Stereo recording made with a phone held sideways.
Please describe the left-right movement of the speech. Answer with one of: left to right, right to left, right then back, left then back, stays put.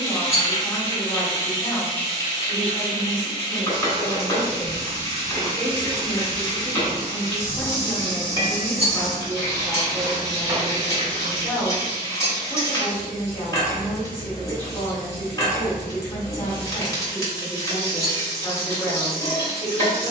stays put.